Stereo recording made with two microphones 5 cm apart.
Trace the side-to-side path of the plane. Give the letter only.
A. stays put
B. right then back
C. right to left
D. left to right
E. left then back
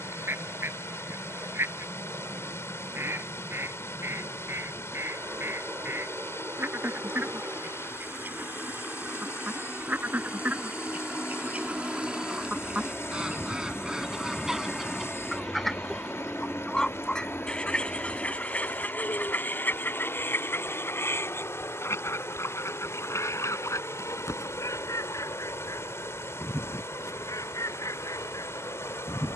C.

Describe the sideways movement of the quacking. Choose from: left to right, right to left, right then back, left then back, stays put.
right to left.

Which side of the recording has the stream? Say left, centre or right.
left.